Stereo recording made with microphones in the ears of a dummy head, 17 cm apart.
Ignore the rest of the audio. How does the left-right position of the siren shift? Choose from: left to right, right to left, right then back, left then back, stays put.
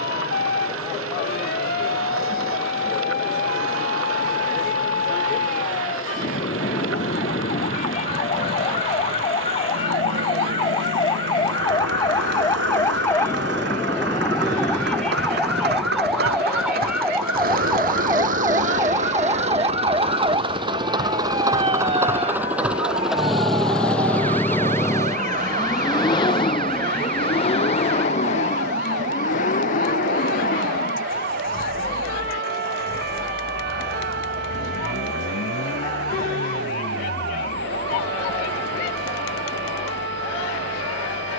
left to right.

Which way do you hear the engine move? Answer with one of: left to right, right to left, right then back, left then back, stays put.
right to left.